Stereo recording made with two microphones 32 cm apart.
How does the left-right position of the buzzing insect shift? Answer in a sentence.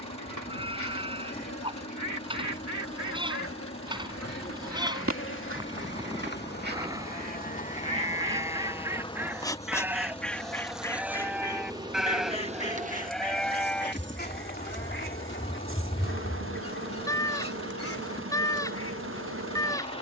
You can hear the buzzing insect move to the right.